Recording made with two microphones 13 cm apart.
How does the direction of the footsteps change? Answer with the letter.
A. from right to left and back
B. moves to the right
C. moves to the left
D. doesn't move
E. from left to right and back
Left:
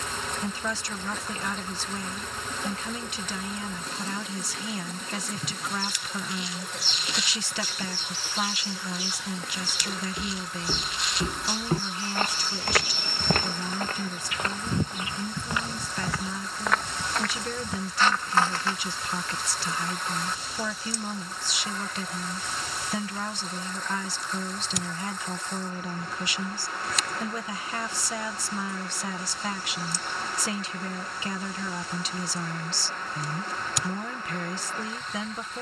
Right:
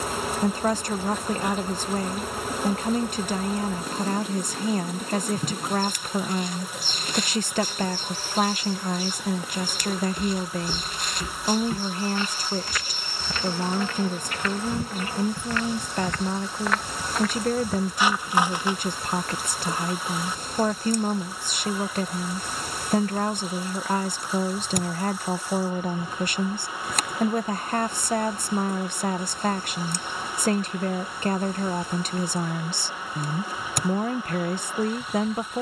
A.